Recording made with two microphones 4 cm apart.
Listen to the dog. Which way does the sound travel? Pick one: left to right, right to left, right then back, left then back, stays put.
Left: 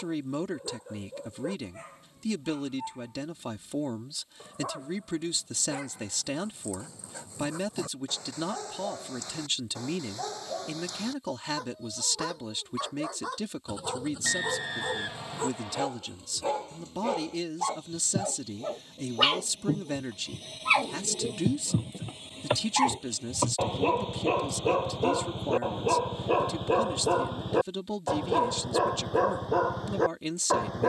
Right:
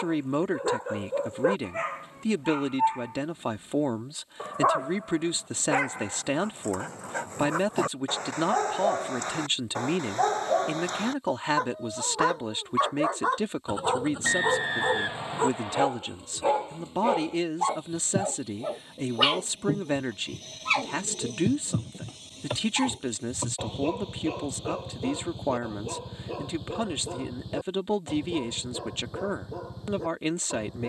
right to left.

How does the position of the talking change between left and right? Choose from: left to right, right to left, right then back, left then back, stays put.
stays put.